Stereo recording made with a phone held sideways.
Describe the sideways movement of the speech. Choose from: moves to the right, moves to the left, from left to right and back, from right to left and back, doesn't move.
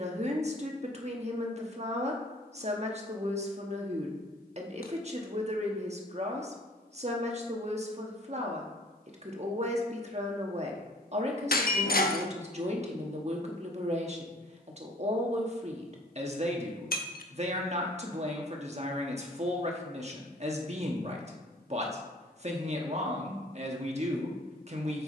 doesn't move.